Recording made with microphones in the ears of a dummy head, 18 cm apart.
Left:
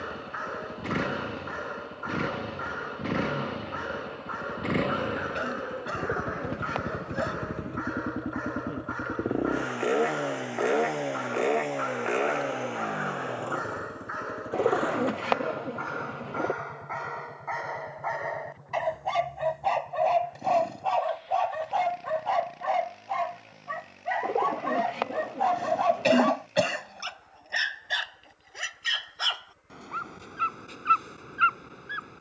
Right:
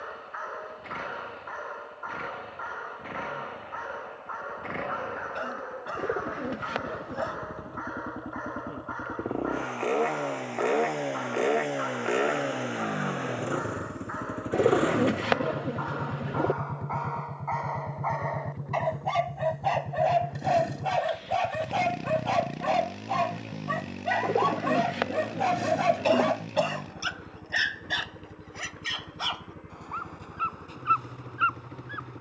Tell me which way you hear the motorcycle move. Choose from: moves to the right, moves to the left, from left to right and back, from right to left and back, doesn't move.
moves to the right.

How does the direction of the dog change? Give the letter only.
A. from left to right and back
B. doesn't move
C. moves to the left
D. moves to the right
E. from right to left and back
A.